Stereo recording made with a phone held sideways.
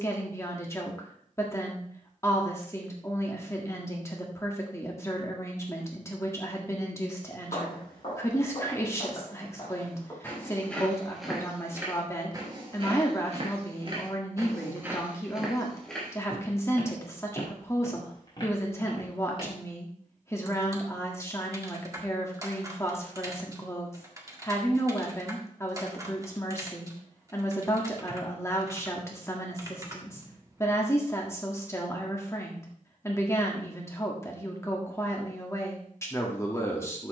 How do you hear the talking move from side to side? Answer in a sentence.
In this clip you hear the talking stay in one place.